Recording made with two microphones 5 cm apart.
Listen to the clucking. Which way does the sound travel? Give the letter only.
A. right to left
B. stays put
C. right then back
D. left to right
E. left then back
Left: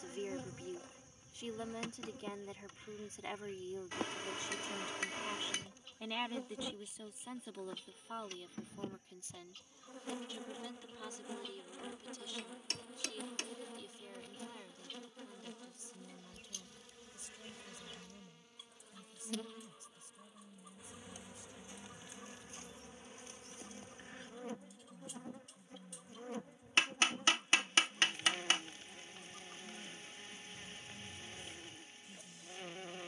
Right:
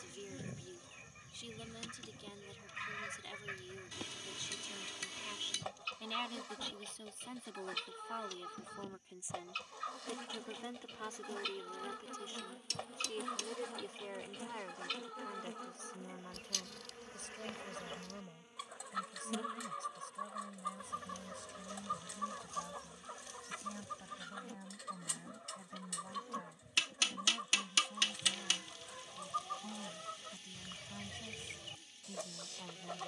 B.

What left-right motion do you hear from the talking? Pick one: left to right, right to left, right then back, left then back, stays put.
left to right.